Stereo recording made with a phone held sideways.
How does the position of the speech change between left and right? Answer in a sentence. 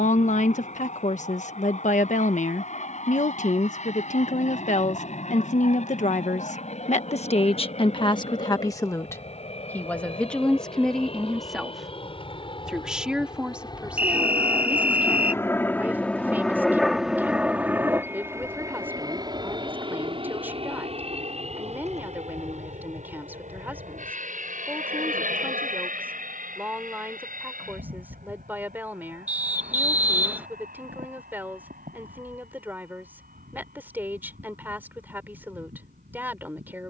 You can hear the speech move to the right.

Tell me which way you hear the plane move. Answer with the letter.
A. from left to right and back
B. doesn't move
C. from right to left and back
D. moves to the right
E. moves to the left
D.